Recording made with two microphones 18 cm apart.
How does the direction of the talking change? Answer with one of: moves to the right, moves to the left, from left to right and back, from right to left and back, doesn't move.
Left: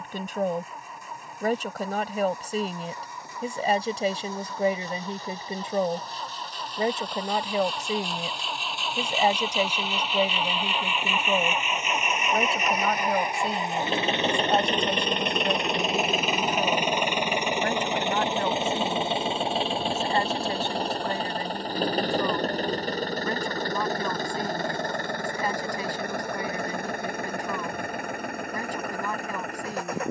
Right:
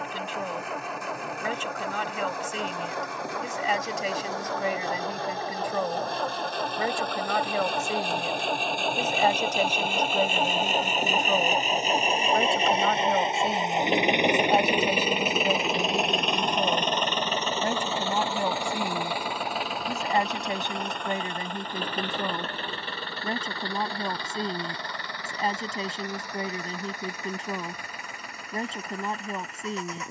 moves to the right.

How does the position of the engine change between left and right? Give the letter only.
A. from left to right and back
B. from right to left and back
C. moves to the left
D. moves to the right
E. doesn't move
C.